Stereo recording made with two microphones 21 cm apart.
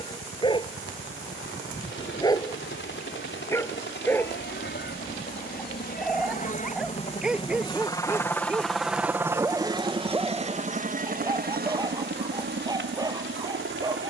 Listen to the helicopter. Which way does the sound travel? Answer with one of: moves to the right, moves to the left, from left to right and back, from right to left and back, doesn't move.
moves to the right.